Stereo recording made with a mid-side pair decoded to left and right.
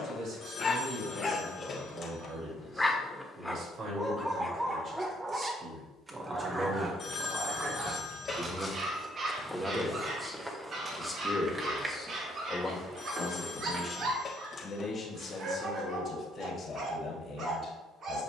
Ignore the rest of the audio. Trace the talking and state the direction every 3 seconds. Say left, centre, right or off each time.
right, right, right, centre, left, left.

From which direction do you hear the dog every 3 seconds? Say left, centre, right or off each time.
left, centre, right, right, right, right.